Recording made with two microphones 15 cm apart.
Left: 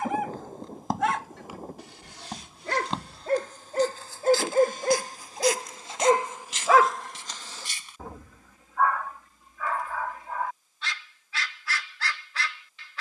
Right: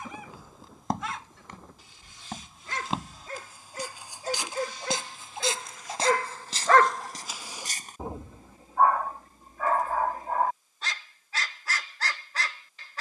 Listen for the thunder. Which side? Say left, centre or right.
left.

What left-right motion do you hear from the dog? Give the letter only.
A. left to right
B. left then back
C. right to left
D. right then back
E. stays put
A.